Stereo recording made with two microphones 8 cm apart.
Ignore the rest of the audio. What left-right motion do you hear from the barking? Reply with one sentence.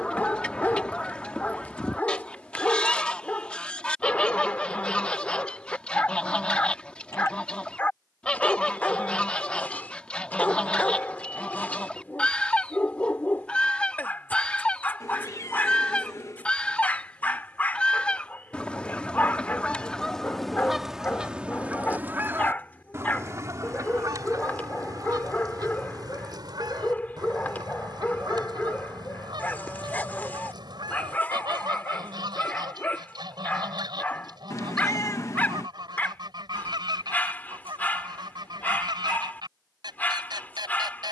In this clip you hear the barking stay put.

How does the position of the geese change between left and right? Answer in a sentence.
In this clip you hear the geese move to the right.